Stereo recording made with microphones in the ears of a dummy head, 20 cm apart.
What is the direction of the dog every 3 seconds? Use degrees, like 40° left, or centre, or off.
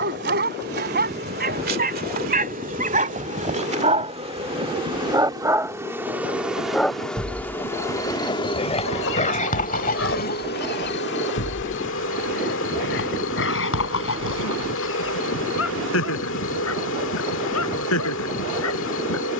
40° right, 30° right, 20° left, 40° left, 60° left, 70° left, 80° left.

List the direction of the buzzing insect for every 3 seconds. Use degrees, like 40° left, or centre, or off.
40° right, 20° right, 10° left, 40° left, 60° left, 60° left, 60° left.